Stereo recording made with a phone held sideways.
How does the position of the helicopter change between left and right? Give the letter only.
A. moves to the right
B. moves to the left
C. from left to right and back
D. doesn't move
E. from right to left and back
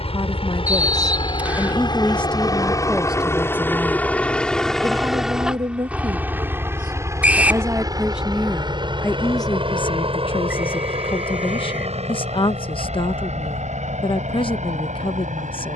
A.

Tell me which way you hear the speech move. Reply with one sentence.
In this clip you hear the speech go right and come back.